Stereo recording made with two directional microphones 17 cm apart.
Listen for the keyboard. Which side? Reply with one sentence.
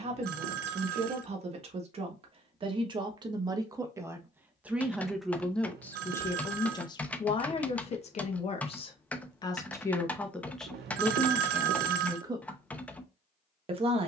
In this clip you hear the keyboard in the centre.